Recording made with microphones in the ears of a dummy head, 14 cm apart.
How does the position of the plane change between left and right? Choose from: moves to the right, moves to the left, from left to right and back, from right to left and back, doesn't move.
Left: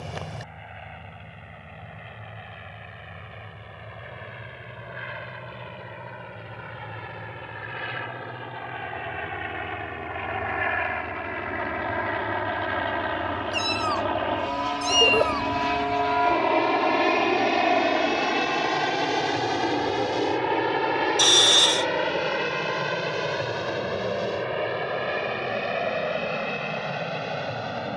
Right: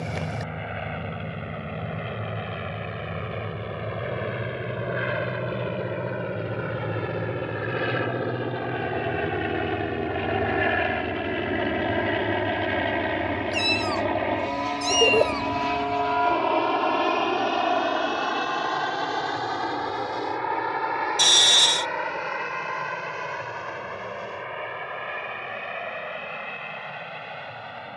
moves to the left.